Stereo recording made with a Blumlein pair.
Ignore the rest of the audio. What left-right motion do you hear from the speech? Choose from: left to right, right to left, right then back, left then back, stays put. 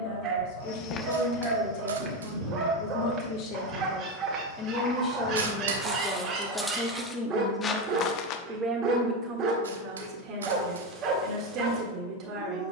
left to right.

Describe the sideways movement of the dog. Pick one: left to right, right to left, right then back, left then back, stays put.
stays put.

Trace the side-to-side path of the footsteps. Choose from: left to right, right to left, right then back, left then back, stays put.
right then back.